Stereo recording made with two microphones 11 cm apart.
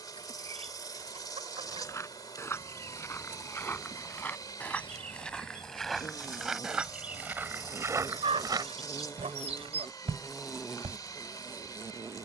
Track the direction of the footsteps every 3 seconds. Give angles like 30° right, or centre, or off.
30° left, 10° left, 20° right, 70° right.